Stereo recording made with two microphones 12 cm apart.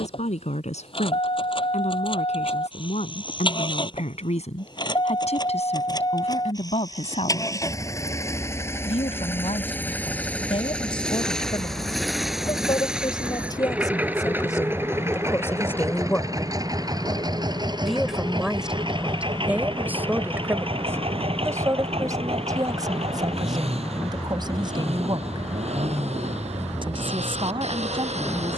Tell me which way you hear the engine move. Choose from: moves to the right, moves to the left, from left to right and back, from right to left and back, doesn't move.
moves to the right.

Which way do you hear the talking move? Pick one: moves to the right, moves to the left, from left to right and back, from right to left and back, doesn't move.
moves to the right.